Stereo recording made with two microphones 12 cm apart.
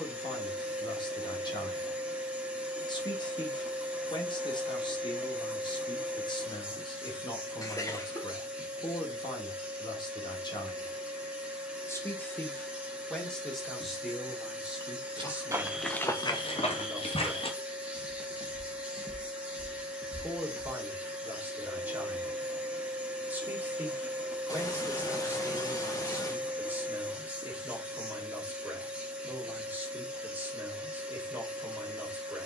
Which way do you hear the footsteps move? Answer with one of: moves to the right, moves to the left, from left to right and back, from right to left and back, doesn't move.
from right to left and back.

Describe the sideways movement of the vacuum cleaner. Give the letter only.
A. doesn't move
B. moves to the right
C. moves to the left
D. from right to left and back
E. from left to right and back
A.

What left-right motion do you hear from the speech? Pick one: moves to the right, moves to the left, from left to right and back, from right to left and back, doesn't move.
moves to the right.